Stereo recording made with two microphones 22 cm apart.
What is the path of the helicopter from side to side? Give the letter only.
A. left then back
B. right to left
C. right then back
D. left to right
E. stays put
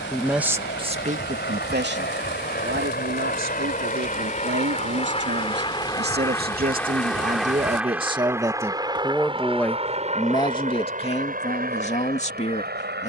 D.